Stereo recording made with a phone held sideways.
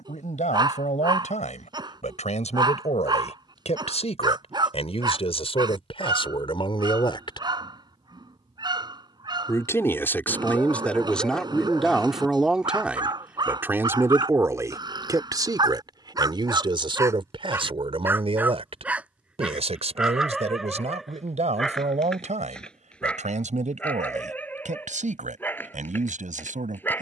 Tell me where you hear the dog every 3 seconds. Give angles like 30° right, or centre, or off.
30° right, 30° right, 30° right, 30° right, 30° right, 30° right, 10° right, 10° left, 10° left.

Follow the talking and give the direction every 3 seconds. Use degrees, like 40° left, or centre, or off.
60° left, 50° left, 40° left, 10° left, 10° right, 30° right, 50° right, 60° right, 60° right.